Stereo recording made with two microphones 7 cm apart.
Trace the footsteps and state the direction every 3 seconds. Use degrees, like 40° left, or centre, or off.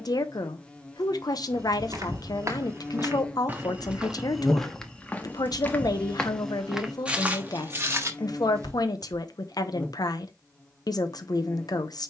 50° right, centre, 20° right, off.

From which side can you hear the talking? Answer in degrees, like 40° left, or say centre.
60° left.